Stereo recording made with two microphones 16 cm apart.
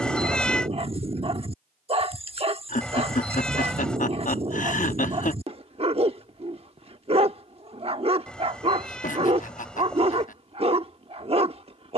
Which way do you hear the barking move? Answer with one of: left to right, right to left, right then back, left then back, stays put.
stays put.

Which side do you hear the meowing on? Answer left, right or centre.
centre.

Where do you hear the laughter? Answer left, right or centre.
left.